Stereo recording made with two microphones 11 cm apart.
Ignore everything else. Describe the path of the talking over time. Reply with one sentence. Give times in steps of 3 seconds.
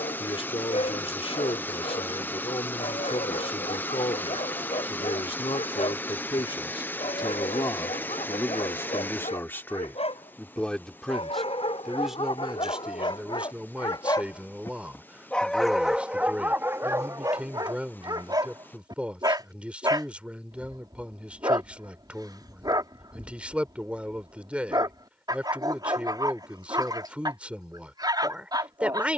You can hear the talking on the left from 0 s and in the centre from 9 s.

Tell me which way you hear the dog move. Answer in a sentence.
In this clip you hear the dog go from the left side to the right.